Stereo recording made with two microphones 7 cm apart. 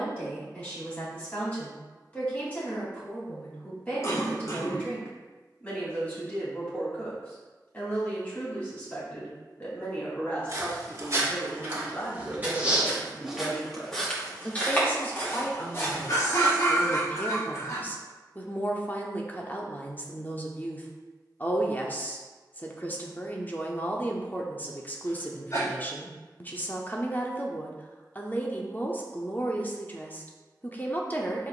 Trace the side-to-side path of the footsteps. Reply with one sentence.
You can hear the footsteps travel towards the left.